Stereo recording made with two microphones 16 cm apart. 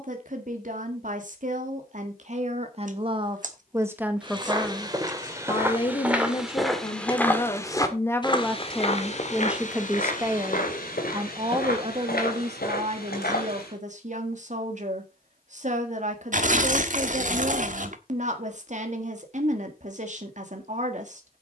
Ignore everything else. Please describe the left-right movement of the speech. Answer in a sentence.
In this clip you hear the speech move from right to left and back again.